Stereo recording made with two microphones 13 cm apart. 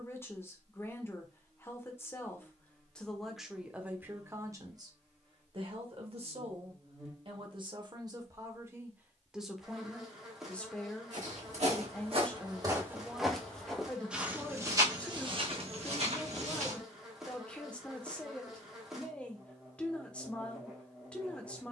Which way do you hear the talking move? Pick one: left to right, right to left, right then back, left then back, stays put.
right then back.